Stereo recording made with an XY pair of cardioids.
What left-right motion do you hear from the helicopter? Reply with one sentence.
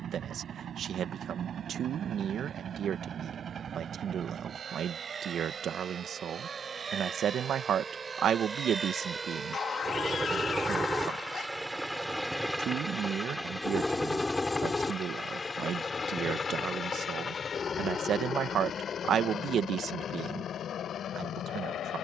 In this clip you hear the helicopter travel towards the left.